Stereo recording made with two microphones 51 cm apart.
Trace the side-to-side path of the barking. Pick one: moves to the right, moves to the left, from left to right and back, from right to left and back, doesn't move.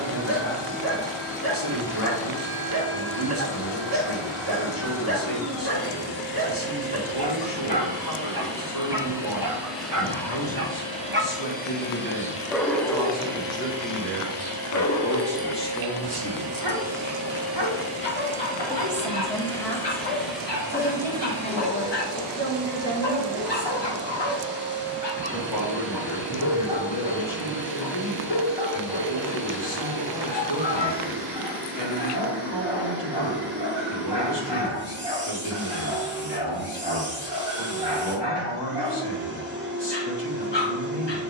moves to the left.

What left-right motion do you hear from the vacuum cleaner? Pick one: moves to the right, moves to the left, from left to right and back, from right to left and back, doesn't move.
from right to left and back.